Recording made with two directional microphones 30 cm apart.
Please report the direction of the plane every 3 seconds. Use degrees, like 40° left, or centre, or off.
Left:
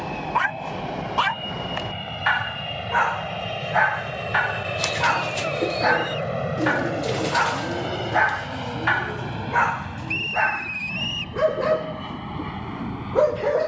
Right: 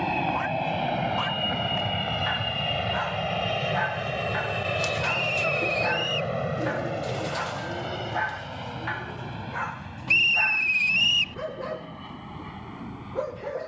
30° right, centre, 30° left, 50° left, 60° left.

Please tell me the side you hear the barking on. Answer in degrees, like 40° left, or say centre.
60° left.